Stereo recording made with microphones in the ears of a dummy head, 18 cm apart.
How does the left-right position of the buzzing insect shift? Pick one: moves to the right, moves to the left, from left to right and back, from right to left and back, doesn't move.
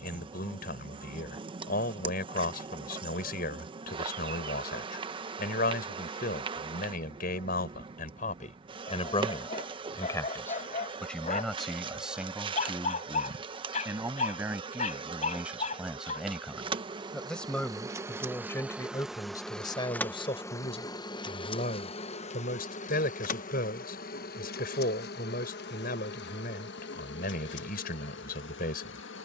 moves to the left.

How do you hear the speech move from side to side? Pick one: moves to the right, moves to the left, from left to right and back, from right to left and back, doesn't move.
from left to right and back.